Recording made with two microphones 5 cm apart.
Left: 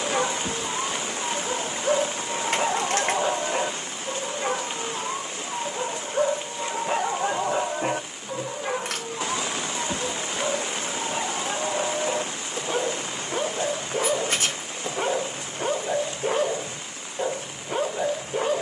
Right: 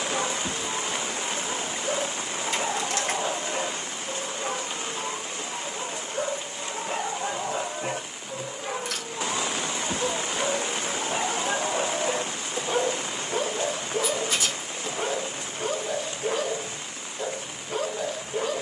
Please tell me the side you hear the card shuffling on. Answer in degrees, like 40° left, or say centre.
50° left.